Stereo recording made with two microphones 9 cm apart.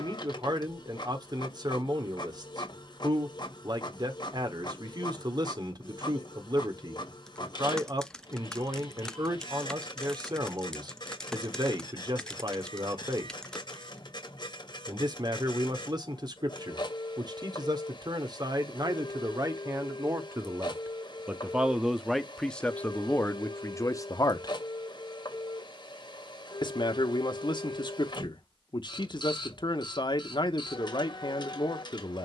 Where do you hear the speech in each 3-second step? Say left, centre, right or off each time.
right, right, right, right, right, right, right, centre, left, left, left.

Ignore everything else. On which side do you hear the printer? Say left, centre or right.
left.